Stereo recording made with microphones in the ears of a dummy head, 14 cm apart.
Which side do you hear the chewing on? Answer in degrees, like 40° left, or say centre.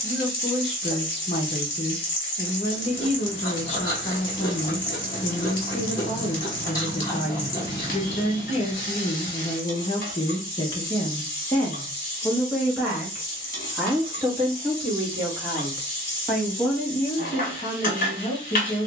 20° left.